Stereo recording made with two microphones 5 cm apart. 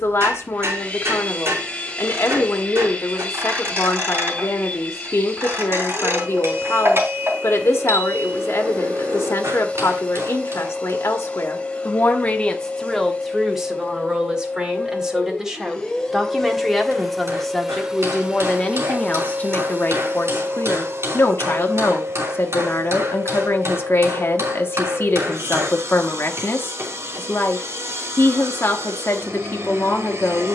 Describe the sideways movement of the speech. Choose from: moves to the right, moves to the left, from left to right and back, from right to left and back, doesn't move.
from left to right and back.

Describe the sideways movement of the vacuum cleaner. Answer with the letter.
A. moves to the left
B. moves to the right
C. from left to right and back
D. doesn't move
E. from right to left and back
B.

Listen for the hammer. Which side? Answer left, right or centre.
right.